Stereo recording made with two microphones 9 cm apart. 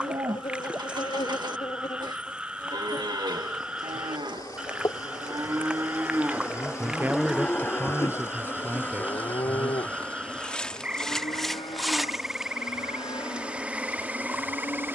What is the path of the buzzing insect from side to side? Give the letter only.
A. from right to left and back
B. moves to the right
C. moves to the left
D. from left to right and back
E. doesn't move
B.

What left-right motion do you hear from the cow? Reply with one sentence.
In this clip you hear the cow move to the left.